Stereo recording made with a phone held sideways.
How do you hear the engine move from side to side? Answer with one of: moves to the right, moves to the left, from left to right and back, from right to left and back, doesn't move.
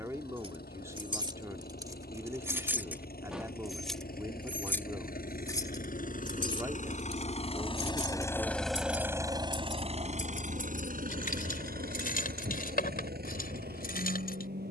moves to the right.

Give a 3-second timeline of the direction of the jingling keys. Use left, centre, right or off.
right, centre, left, left, left.